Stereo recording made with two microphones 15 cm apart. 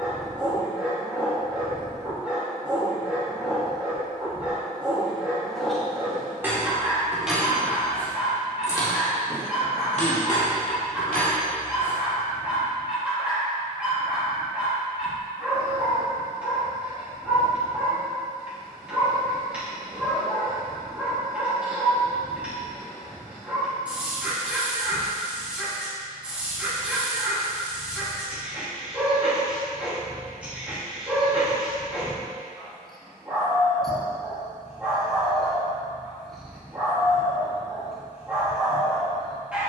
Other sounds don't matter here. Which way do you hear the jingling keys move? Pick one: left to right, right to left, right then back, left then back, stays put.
right to left.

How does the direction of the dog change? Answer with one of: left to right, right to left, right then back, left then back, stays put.
stays put.